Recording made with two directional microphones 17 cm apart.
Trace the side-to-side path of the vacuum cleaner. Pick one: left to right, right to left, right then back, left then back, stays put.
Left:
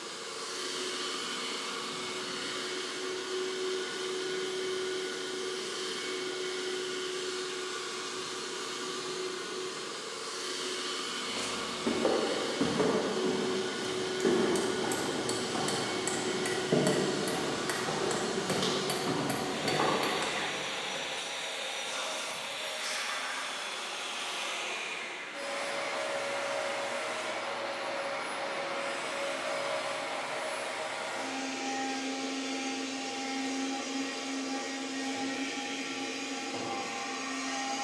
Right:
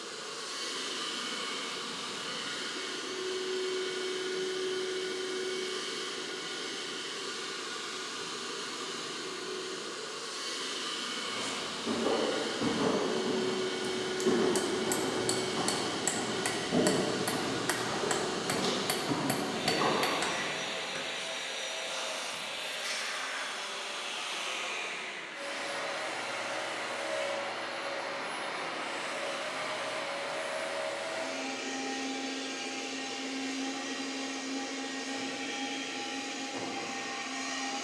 stays put.